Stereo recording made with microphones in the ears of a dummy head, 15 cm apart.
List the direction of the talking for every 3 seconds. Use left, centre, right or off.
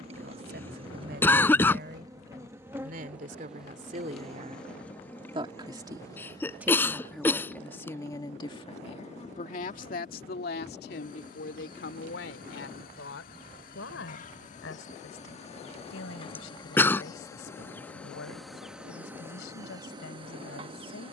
right, right, centre, left, left, left, left.